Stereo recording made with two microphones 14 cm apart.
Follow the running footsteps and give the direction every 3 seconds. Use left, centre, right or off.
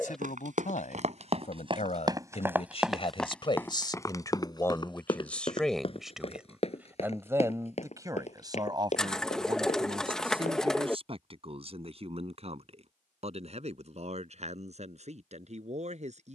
right, left, left, left, off, off.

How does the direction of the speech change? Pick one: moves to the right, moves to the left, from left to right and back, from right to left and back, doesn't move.
moves to the right.